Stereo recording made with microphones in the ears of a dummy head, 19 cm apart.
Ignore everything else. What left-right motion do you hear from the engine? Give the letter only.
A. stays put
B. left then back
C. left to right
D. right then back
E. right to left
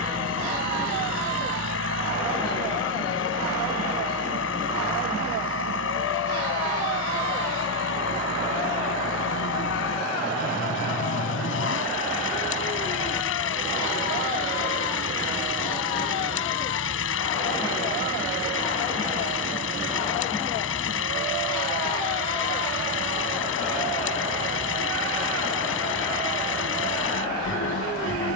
A.